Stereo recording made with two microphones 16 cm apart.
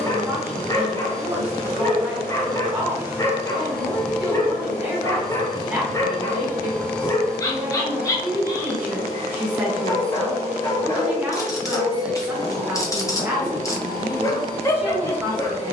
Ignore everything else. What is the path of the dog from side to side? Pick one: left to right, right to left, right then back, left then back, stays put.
stays put.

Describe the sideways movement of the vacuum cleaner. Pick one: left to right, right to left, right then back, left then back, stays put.
left then back.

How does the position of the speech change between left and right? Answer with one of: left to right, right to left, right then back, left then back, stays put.
stays put.